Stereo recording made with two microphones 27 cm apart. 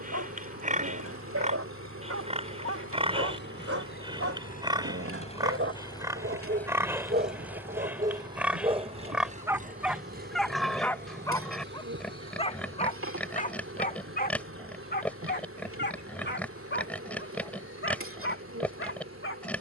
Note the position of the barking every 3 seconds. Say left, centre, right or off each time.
right, right, right, centre, left, left, left.